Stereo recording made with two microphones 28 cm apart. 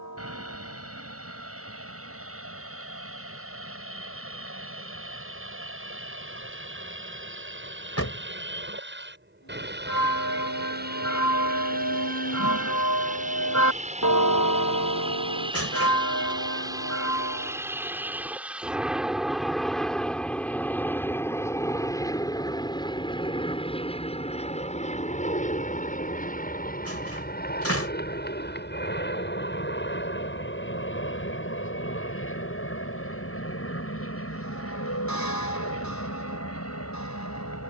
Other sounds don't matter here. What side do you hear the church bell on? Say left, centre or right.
left.